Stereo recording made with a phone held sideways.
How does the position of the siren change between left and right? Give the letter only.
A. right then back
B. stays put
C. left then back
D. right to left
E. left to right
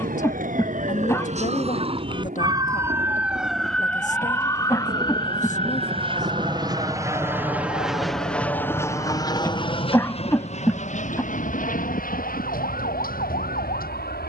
D.